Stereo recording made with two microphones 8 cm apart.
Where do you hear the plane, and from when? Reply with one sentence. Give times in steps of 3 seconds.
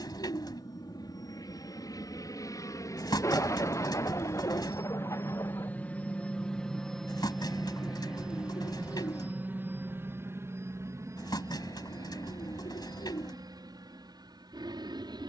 In this clip you hear the plane on the left from 0 s, in the centre from 6 s and on the right from 9 s.